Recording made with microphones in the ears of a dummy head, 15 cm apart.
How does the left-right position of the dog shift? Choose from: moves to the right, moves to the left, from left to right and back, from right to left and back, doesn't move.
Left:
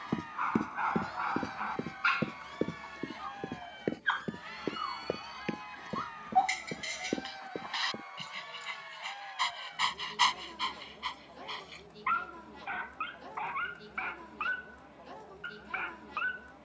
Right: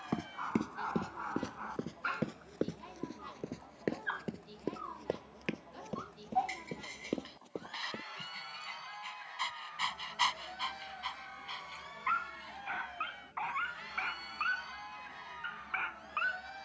moves to the right.